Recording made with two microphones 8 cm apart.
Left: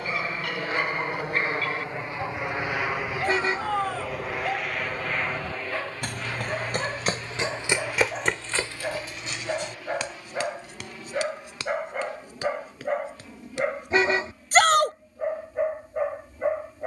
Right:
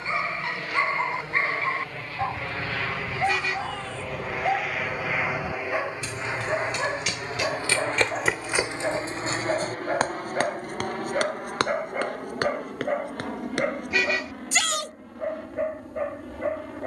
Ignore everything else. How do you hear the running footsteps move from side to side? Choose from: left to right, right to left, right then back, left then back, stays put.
left to right.